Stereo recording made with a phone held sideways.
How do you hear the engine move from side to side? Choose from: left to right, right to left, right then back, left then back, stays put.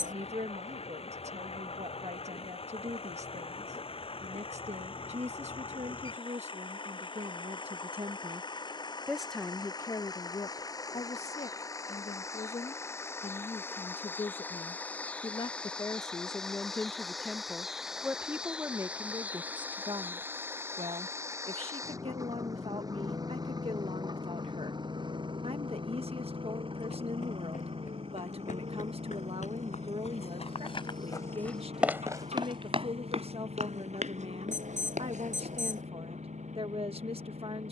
left to right.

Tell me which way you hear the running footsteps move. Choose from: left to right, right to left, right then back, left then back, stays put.
left to right.